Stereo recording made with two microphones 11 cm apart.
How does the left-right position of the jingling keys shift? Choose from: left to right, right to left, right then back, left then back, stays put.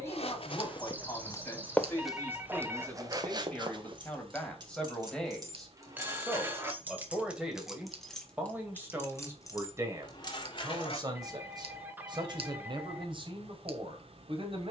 right to left.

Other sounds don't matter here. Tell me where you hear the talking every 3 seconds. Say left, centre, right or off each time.
left, centre, centre, right, right.